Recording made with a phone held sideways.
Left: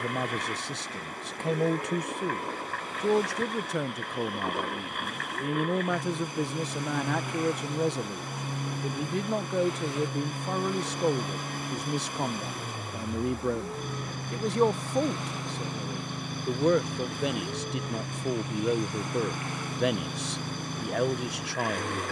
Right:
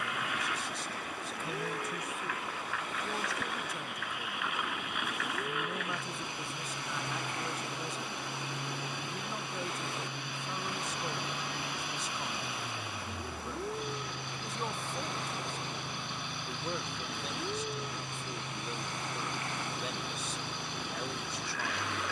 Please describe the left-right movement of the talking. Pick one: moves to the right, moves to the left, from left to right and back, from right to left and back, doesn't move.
doesn't move.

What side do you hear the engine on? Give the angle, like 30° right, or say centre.
50° left.